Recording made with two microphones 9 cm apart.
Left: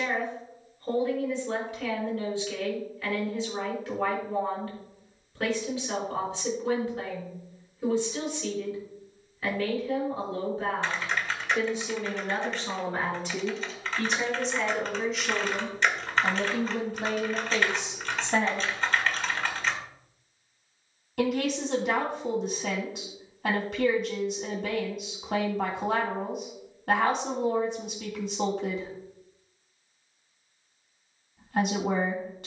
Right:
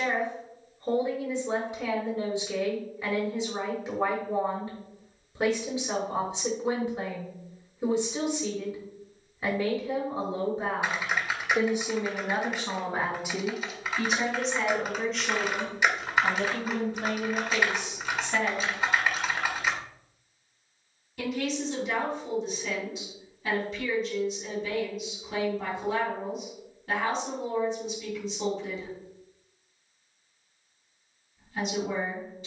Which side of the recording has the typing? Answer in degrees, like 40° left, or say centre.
10° right.